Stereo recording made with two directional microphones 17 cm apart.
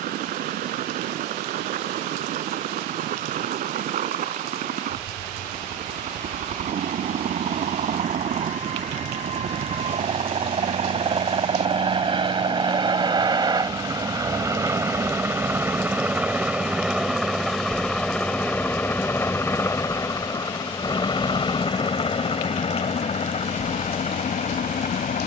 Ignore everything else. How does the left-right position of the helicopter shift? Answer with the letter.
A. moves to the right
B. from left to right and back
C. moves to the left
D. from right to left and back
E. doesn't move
C.